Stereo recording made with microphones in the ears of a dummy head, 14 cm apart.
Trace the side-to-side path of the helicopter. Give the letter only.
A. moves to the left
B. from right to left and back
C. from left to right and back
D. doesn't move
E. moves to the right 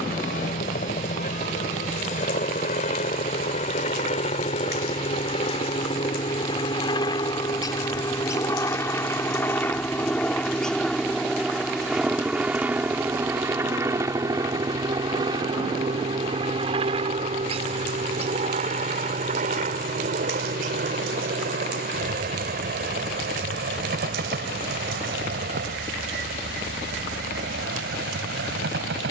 E.